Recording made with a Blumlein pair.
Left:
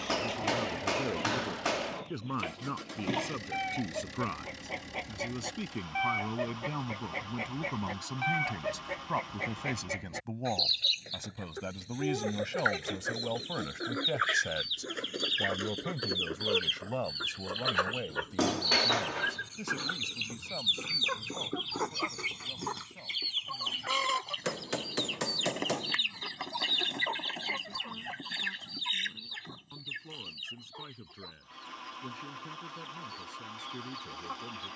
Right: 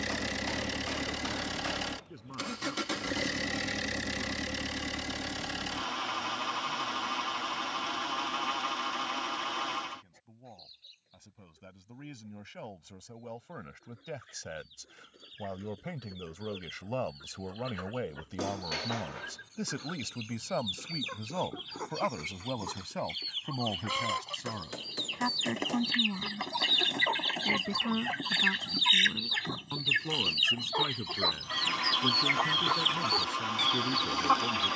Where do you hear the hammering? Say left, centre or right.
left.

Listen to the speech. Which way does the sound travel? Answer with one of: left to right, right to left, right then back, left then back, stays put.
left to right.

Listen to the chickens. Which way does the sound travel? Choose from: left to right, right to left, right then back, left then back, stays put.
left to right.